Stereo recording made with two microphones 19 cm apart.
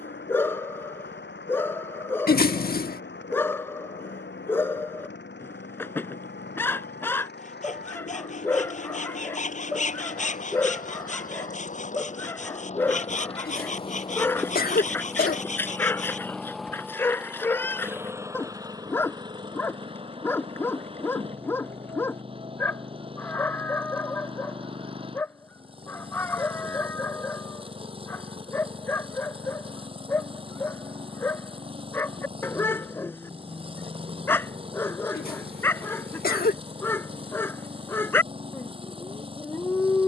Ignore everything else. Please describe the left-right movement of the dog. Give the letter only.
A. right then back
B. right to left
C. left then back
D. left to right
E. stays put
E.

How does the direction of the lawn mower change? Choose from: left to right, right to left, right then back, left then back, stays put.
left to right.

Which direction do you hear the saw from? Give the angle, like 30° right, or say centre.
40° left.